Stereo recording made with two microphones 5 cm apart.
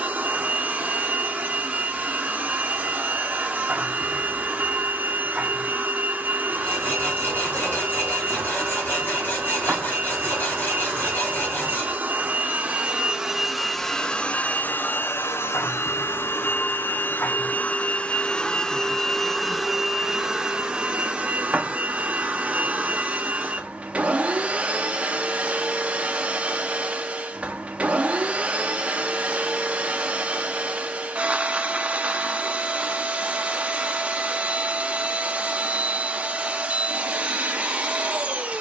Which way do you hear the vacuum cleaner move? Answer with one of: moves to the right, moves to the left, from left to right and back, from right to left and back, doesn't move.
from right to left and back.